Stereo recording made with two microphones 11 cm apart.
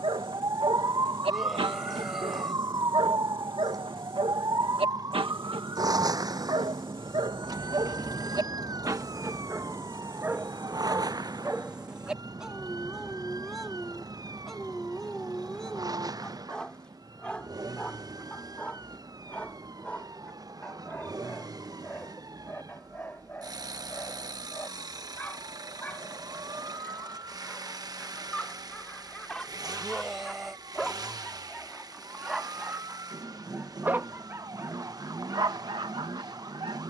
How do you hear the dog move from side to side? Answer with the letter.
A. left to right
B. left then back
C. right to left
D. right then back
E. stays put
B.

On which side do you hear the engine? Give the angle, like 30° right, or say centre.
40° right.